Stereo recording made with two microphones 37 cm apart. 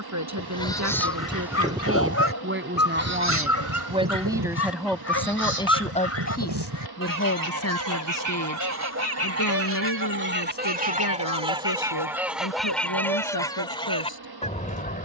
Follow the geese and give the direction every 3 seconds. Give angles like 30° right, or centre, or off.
10° right, 60° right, 60° right, 30° right, 10° left.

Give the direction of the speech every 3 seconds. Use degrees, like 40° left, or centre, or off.
40° right, centre, 40° left, 60° left, 70° left.